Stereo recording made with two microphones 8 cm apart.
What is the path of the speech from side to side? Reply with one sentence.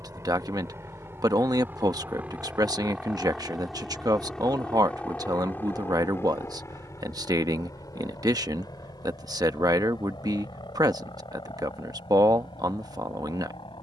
You can hear the speech stay in one place.